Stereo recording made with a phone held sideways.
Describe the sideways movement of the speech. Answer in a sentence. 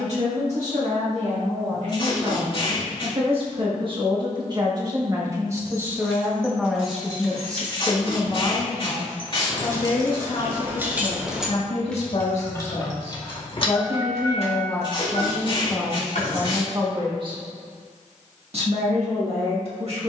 In this clip you hear the speech go left and come back.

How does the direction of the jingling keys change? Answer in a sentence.
In this clip you hear the jingling keys go from the right side to the left.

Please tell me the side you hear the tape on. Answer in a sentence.
In this clip you hear the tape on the left.